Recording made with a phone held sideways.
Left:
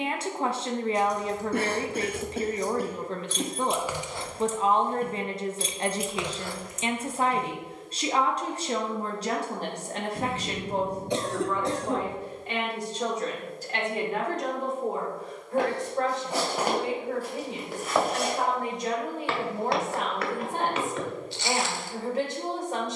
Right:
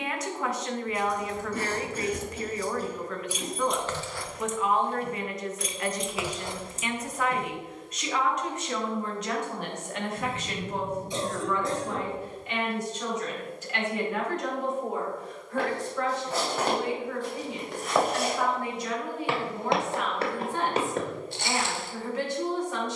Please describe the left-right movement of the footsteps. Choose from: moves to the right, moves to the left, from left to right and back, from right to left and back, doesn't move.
moves to the right.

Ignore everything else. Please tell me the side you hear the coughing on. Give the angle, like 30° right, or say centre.
70° left.